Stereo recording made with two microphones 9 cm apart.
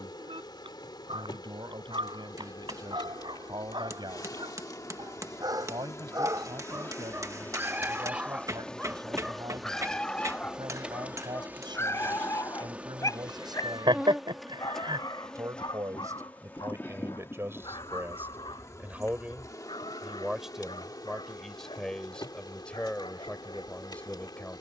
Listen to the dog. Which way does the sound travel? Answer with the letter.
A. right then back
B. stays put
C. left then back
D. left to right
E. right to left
E.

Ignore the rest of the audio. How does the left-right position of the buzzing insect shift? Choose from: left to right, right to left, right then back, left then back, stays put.
right then back.